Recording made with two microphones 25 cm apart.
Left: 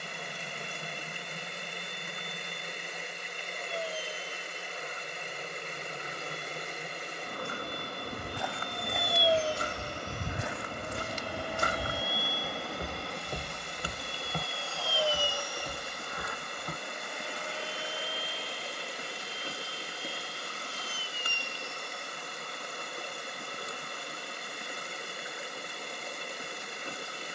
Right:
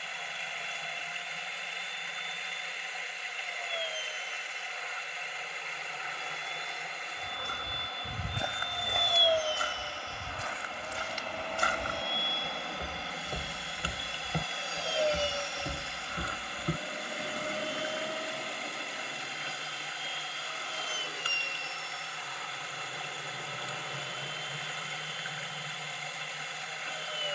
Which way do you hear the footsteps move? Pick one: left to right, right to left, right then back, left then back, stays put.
left then back.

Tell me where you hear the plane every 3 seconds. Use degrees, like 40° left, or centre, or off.
50° left, 50° left, 40° left, 20° left, 10° right, 30° right, 50° right, 60° right, 70° right.